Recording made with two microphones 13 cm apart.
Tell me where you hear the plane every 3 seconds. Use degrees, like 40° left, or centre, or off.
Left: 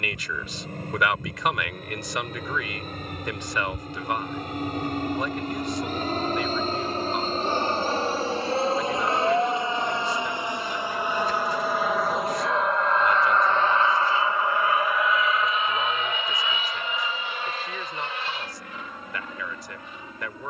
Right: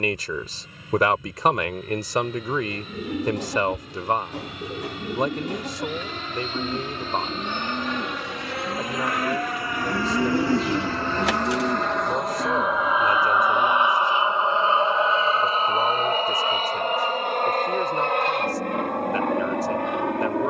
60° left, 50° left, 40° left, 20° left, 10° right, 40° right, 60° right.